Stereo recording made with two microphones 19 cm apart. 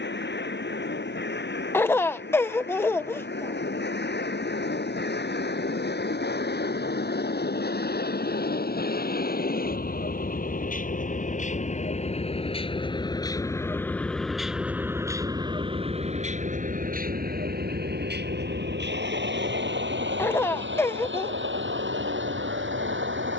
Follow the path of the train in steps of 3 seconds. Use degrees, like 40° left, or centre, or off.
70° left, 60° left, 60° left, 50° left, 10° left, 40° right, 70° right, 80° right.